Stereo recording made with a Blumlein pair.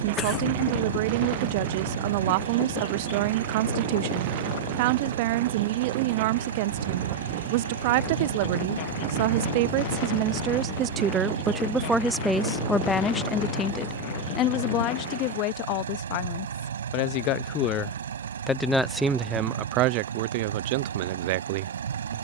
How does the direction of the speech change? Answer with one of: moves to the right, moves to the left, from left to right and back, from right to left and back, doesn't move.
from right to left and back.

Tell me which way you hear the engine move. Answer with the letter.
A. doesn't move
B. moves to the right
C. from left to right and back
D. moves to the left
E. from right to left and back
A.